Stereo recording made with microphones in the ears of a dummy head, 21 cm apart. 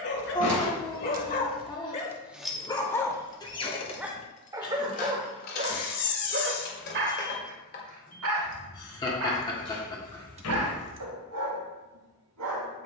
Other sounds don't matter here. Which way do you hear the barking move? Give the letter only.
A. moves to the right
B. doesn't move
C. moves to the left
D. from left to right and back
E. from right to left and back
A.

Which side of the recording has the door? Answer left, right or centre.
left.